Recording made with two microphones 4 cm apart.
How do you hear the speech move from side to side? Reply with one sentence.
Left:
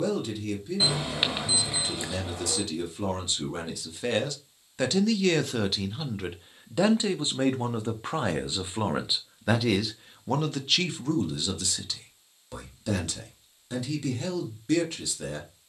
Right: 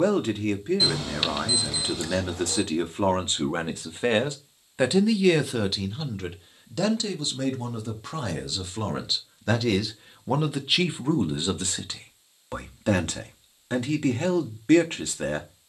In this clip you hear the speech move from right to left and back again.